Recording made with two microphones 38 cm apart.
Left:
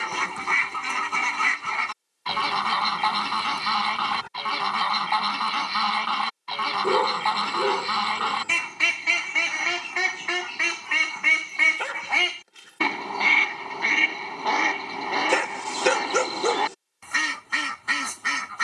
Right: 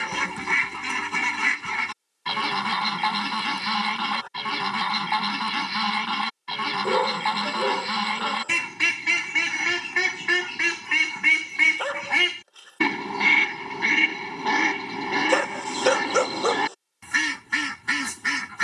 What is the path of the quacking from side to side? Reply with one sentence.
You can hear the quacking stay put.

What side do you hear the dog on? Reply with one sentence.
You can hear the dog on the left.